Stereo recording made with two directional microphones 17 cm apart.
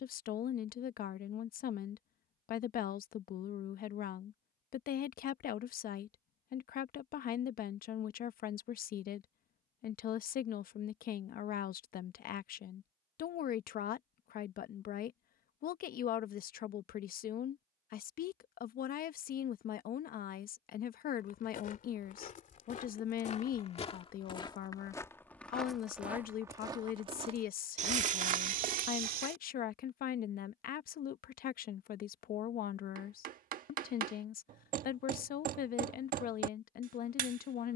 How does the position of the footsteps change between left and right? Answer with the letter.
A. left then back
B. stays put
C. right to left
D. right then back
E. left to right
E.